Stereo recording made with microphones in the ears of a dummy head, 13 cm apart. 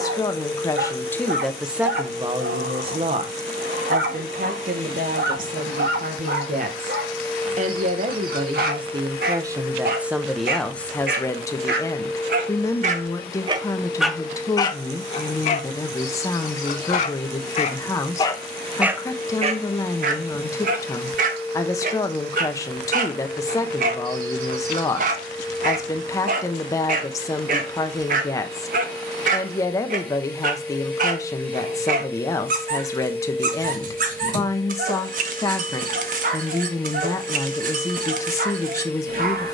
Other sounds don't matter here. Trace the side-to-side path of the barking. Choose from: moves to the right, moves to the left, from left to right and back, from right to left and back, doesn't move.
from right to left and back.